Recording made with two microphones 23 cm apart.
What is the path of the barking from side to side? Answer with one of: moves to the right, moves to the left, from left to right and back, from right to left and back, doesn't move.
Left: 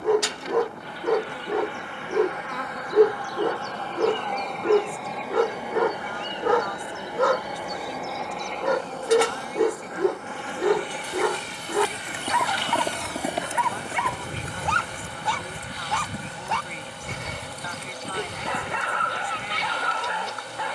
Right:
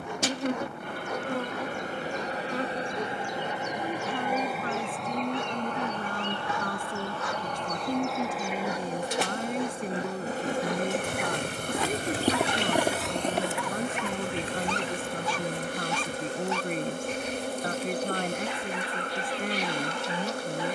doesn't move.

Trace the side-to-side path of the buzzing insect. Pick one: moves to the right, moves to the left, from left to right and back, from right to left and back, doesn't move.
from right to left and back.